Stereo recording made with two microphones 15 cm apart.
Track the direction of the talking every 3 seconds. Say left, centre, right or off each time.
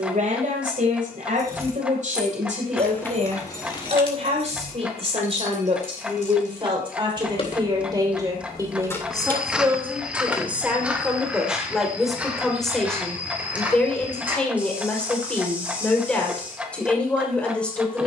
right, right, right, centre, centre, centre.